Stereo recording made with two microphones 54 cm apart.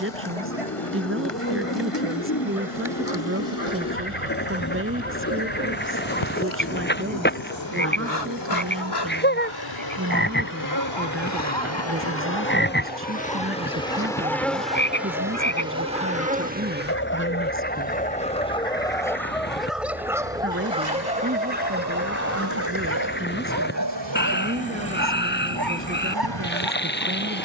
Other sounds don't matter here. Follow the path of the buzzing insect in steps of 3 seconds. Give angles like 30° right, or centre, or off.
70° left, 60° left, 50° left, 40° left, 10° left, 10° right, 40° right, 50° right, 60° right.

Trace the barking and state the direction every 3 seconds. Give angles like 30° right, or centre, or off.
70° left, 70° left, 60° left, 60° left, 40° left, 30° left, centre, 20° right, 40° right.